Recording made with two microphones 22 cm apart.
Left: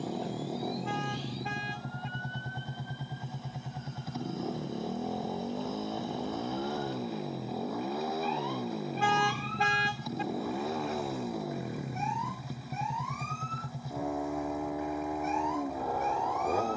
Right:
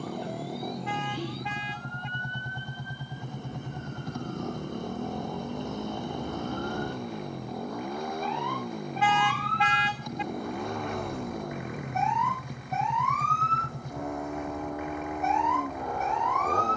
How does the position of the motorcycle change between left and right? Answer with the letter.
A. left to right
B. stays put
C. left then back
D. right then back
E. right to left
B.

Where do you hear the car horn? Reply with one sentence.
You can hear the car horn on the left.